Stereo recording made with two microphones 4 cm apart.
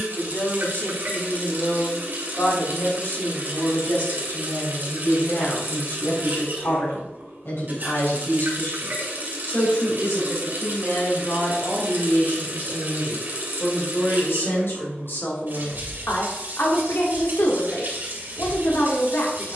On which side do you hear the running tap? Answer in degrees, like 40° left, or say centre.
50° right.